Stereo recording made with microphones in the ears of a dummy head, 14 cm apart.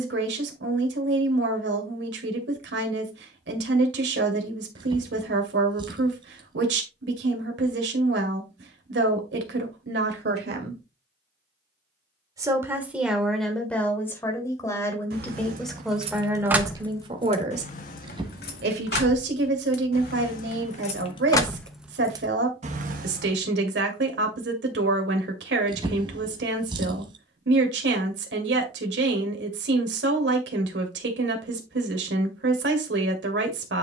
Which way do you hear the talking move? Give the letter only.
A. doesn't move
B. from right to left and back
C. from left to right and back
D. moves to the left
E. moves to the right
B.